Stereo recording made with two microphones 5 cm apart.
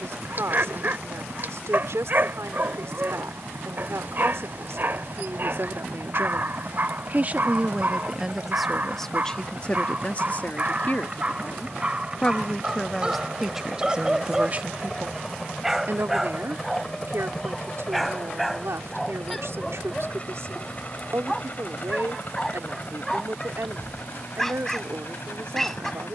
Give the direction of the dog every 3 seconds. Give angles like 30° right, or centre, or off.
40° right, 40° right, 40° right, 30° right, 20° right, centre, centre, 10° left, 10° left.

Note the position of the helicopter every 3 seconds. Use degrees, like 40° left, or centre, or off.
50° right, 50° right, 40° right, 30° right, 10° right, 10° left, 20° left, 40° left, 50° left.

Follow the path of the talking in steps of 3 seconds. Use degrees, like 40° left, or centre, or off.
70° right, 70° right, 20° right, 30° left, 10° right, 60° right, 70° right, 70° right, 70° right.